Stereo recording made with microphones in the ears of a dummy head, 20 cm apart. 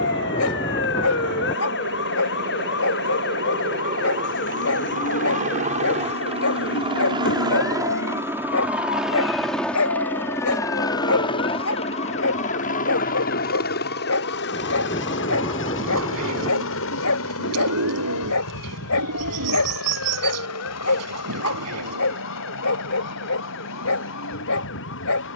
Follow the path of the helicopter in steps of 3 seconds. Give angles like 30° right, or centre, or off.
50° right, 40° right, 20° right, 10° left, 40° left, 60° left, 70° left, 70° left, 80° left.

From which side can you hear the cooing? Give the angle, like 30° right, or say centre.
70° right.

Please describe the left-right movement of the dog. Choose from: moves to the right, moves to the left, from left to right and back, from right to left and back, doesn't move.
doesn't move.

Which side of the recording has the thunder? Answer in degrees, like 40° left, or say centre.
20° left.